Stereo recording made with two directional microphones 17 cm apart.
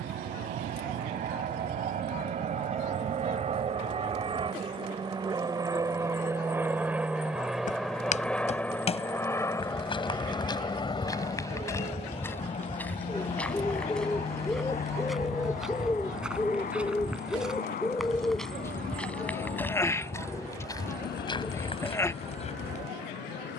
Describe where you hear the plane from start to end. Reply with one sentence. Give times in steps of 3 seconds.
You can hear the plane on the right from 0 s, in the centre from 6 s and on the left from 9 s.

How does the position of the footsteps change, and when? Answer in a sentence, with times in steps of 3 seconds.
In this clip you hear the footsteps not at all from 0 s, on the left from 6 s, in the centre from 12 s and on the left from 21 s.